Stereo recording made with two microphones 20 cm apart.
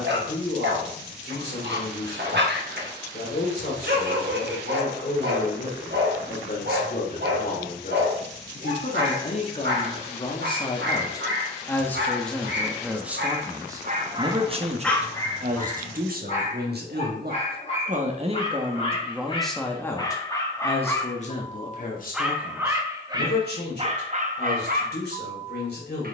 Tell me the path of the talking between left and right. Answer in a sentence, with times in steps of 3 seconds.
You can hear the talking on the left from 0 s, in the centre from 12 s, on the right from 15 s, in the centre from 18 s and on the left from 21 s.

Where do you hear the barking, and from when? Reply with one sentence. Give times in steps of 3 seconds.
In this clip you hear the barking on the right from 0 s, on the left from 15 s, in the centre from 21 s and on the right from 24 s.